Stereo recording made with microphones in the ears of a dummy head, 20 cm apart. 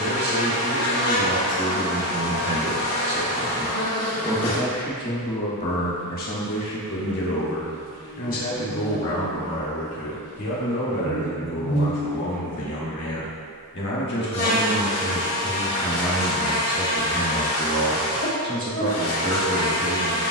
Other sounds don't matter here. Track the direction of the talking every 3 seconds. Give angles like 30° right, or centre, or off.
30° right, 10° left, 50° left, 70° left, 50° left, centre, 30° right.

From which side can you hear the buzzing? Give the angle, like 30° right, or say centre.
70° left.